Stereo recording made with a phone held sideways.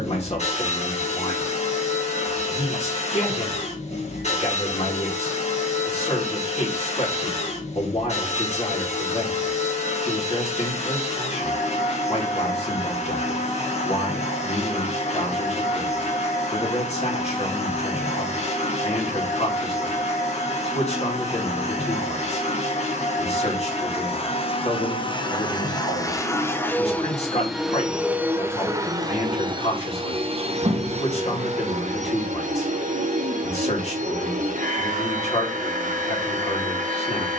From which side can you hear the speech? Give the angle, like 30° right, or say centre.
50° left.